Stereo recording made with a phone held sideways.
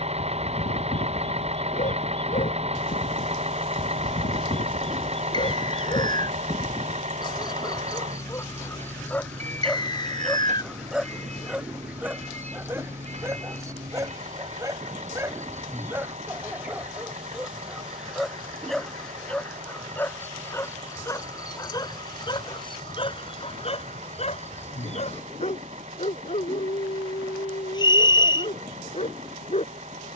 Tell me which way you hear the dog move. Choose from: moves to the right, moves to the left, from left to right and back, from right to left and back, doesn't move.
from left to right and back.